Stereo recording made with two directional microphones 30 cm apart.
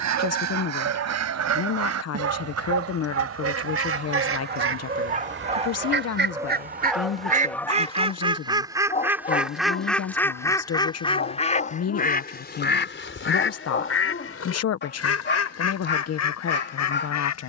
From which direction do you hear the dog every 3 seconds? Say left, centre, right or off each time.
right, right, centre, left, left, left.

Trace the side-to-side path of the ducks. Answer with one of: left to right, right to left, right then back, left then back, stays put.
right to left.